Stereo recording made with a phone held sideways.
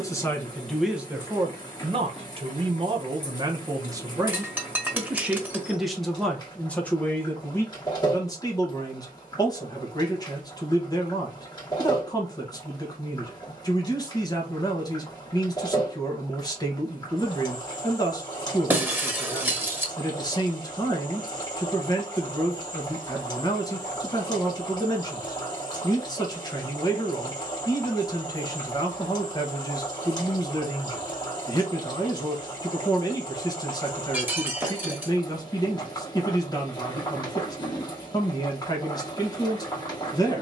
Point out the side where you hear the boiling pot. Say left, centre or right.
left.